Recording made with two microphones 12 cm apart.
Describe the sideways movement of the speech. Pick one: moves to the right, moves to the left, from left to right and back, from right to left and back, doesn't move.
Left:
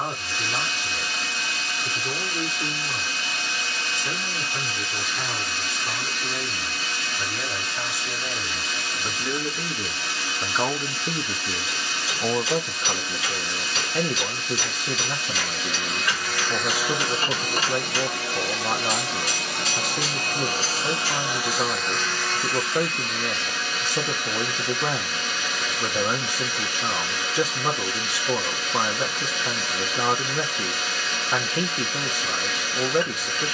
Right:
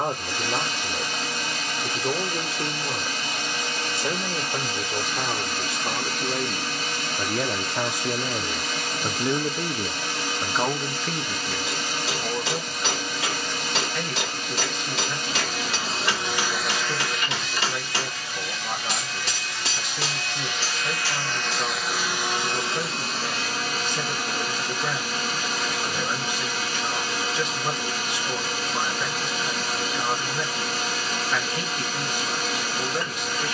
moves to the left.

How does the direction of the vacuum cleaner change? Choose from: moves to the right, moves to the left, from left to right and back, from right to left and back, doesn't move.
from right to left and back.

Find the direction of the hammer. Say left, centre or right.
right.